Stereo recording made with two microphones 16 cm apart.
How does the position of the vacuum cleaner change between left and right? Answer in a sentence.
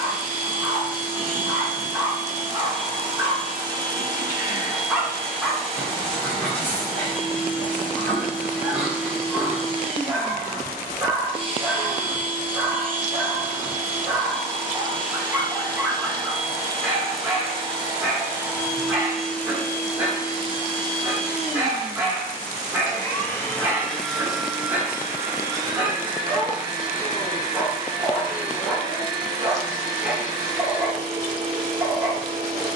In this clip you hear the vacuum cleaner go left and come back.